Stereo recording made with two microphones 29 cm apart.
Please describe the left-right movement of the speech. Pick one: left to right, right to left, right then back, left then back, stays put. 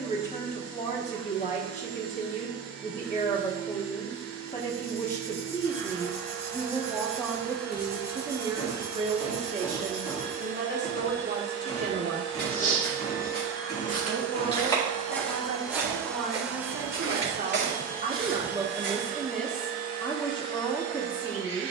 right then back.